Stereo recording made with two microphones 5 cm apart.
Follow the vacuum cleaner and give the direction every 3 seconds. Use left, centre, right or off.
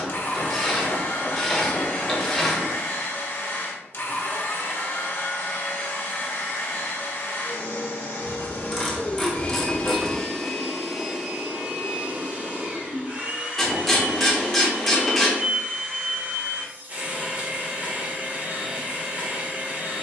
left, left, left, centre, right, right, right.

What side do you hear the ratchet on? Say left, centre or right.
centre.